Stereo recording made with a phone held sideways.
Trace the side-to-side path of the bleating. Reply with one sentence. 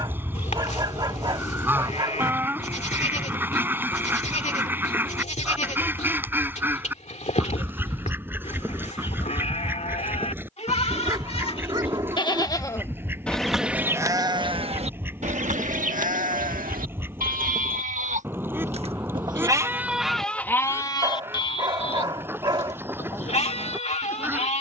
You can hear the bleating move from left to right and back again.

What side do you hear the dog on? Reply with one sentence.
You can hear the dog on the right.